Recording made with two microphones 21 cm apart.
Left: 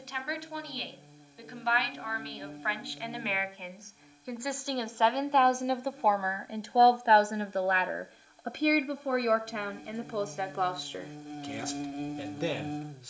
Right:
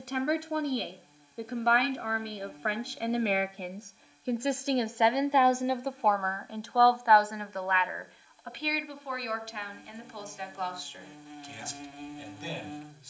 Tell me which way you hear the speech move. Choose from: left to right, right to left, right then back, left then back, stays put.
right to left.